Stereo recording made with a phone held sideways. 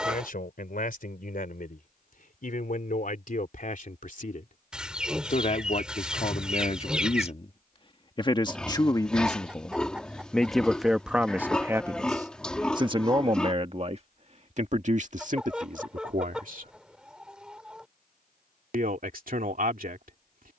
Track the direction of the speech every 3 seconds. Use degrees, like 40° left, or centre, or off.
60° left, 50° left, 40° left, centre, 40° right, 60° right, 60° right.